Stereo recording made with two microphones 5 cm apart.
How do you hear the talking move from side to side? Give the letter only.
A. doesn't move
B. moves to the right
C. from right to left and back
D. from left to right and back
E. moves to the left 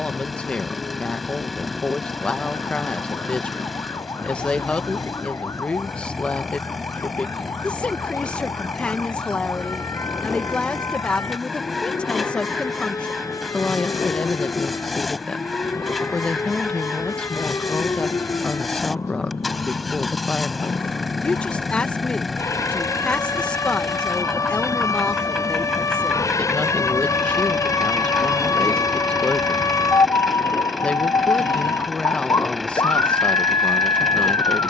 A.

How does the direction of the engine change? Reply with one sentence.
You can hear the engine stay in one place.